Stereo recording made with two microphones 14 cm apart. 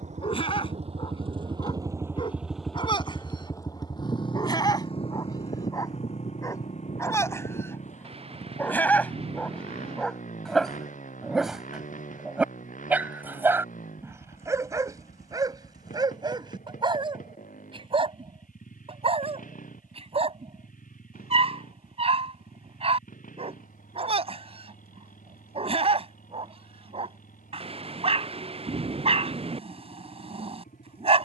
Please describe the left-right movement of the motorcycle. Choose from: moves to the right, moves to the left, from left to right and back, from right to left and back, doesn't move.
moves to the left.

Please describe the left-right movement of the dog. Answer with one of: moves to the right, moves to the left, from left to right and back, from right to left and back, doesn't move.
moves to the right.